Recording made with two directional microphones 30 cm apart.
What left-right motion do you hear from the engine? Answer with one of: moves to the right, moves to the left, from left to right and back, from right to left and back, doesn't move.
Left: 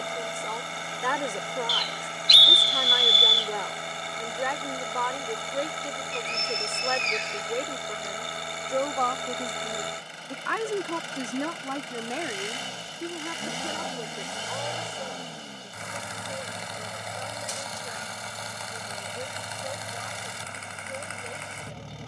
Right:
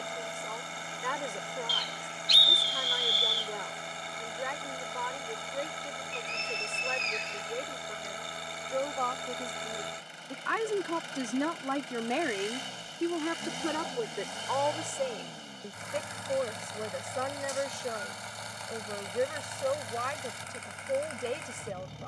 doesn't move.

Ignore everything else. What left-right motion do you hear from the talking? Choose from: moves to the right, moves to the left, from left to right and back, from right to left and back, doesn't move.
moves to the right.